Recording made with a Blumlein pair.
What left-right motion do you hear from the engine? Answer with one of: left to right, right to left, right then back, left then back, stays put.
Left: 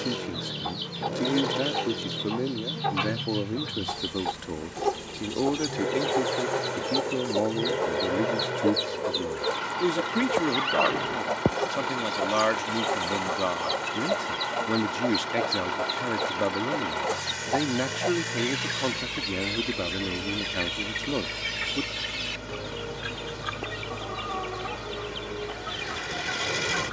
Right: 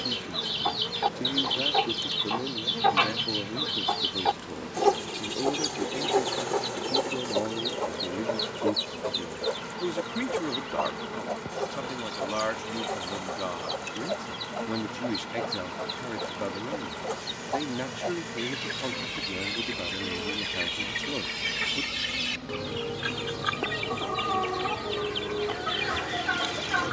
stays put.